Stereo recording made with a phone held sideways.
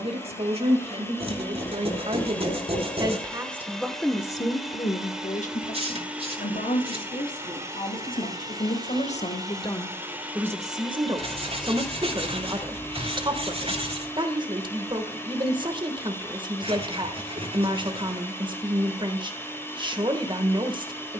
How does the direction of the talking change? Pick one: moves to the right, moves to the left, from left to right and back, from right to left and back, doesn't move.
from right to left and back.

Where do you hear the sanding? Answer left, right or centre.
right.